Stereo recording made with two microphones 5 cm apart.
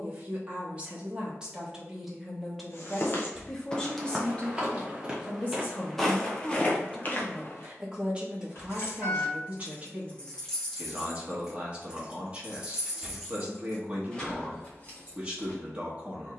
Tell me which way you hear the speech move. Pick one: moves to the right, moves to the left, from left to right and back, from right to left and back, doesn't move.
from right to left and back.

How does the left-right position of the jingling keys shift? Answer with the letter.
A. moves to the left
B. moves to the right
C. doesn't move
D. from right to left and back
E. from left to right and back
E.